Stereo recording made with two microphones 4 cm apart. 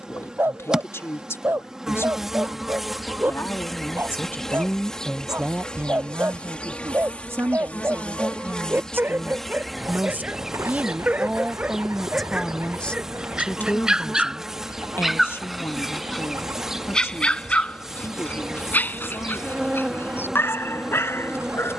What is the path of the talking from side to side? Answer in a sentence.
You can hear the talking go right and come back.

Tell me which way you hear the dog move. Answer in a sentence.
In this clip you hear the dog go from the right side to the left.